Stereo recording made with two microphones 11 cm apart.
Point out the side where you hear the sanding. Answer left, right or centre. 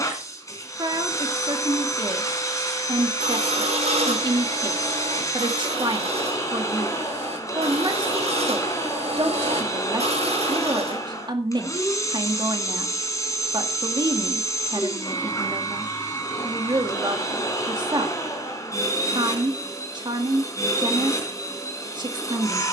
right.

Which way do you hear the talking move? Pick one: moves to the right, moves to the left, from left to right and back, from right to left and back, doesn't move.
doesn't move.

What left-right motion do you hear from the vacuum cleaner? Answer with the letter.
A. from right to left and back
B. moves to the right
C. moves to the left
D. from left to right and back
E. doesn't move
E.